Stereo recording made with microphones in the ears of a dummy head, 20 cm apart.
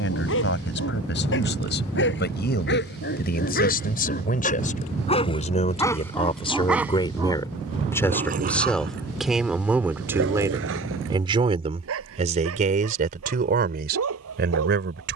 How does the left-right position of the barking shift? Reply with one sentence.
You can hear the barking move from left to right.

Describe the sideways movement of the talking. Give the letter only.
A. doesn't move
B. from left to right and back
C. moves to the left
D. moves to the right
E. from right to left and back
D.